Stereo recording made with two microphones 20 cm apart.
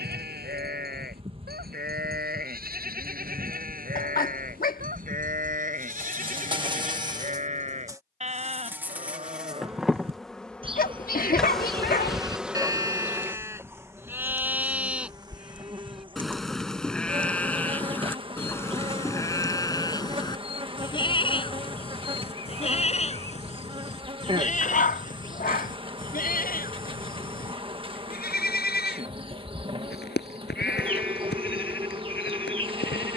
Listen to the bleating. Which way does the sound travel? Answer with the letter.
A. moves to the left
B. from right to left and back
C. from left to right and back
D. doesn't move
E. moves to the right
A.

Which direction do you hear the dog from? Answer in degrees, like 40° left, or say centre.
50° left.